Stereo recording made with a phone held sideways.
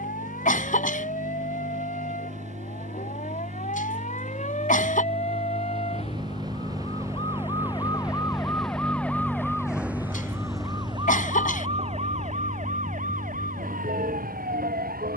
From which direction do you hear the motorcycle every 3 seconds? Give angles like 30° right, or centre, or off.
60° right, 40° right, 10° right, 30° left, 60° left.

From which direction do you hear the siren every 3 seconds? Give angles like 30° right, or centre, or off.
60° left, 50° left, 30° left, 20° right, 60° right.